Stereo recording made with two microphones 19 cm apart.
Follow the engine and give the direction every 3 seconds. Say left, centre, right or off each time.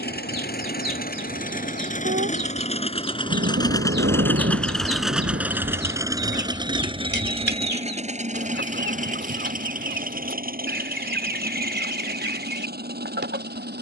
left, centre, right, right, right.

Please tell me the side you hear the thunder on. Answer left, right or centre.
right.